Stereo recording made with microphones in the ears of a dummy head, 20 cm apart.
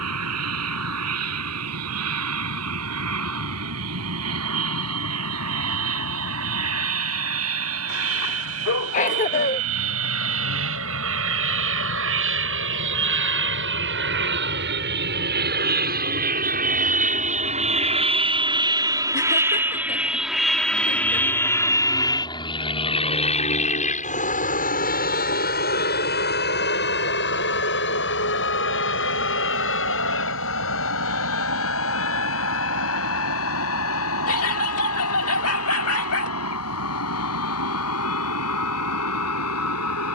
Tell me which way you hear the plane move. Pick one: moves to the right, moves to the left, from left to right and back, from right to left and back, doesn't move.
moves to the left.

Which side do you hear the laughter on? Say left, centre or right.
left.